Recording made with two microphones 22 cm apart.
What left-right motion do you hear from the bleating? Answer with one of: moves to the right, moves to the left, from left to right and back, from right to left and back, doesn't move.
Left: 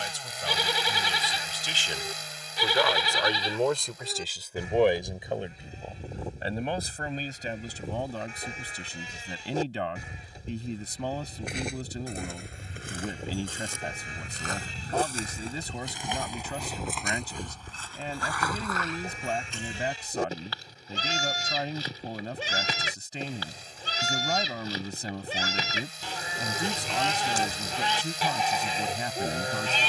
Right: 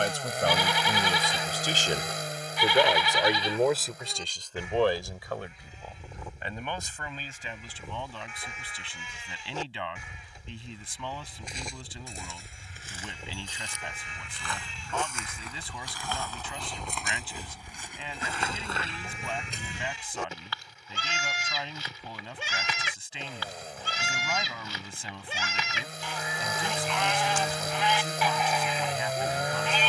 doesn't move.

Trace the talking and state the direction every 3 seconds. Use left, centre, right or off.
right, centre, left, left, left, left, left, left, left, left.